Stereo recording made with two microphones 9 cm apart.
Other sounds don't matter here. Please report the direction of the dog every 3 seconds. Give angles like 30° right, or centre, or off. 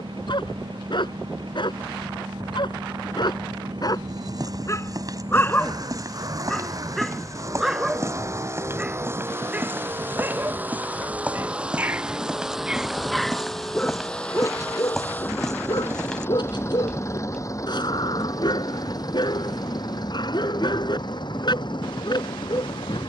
60° left, 30° left, centre, 20° right, 10° left, 50° left, 50° left, 50° left.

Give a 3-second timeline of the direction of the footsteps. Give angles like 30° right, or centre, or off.
off, 40° right, 30° right, 20° right, centre, centre, off, off.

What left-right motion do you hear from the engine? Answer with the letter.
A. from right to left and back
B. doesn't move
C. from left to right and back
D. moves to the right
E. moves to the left
E.